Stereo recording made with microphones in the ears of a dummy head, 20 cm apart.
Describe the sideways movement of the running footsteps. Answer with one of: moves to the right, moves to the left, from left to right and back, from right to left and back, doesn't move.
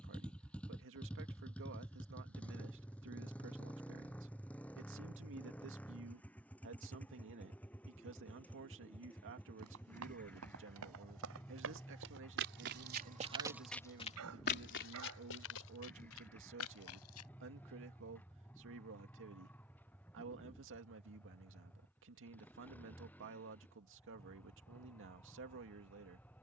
moves to the left.